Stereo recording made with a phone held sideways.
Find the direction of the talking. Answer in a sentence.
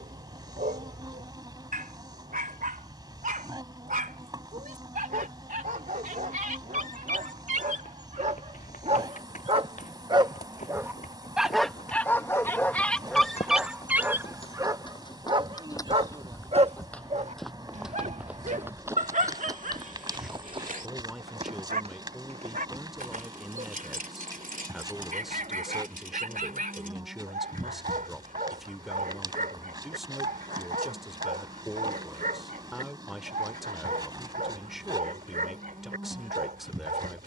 In this clip you hear the talking in the centre.